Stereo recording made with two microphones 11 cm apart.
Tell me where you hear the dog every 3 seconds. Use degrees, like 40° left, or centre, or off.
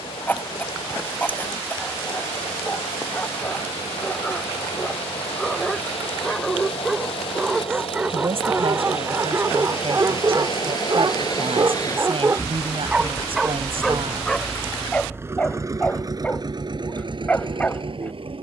20° left, 10° left, 10° right, 30° right, 10° right, 10° left.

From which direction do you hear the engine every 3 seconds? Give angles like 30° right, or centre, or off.
70° left, 70° left, 60° left, 50° left, 10° left, 40° right.